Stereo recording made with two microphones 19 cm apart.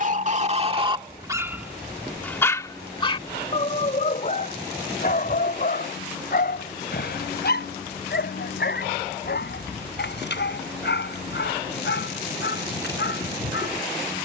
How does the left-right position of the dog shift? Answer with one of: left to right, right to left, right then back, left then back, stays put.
right to left.